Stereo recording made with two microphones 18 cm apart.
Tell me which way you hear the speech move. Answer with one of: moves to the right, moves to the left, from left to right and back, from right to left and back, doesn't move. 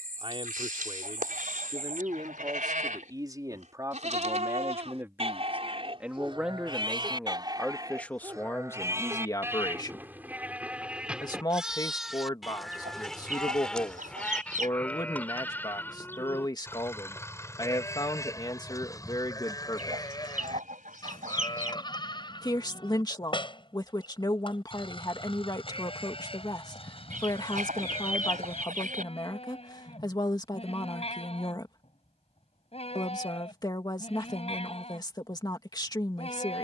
moves to the left.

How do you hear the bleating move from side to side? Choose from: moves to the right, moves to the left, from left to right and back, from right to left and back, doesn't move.
moves to the left.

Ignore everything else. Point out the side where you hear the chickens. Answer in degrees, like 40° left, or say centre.
50° right.